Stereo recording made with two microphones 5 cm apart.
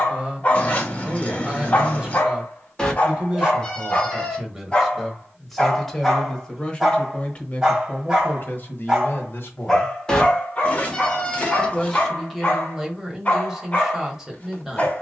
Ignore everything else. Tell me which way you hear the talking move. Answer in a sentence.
You can hear the talking move from right to left and back again.